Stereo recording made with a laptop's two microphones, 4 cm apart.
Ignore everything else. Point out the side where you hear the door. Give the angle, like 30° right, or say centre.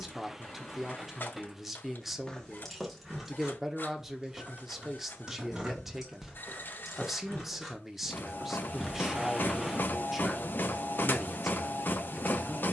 10° right.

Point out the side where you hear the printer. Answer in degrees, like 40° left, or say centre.
50° left.